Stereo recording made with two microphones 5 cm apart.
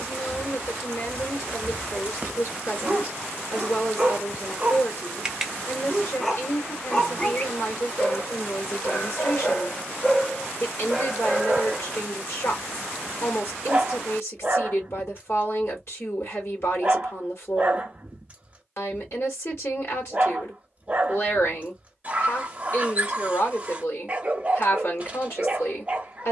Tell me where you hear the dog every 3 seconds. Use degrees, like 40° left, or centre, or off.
30° right, 20° right, 20° left, 10° left, 30° right, 30° right, 30° right, 30° right, 30° right.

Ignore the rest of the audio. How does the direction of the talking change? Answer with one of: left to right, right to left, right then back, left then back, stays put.
stays put.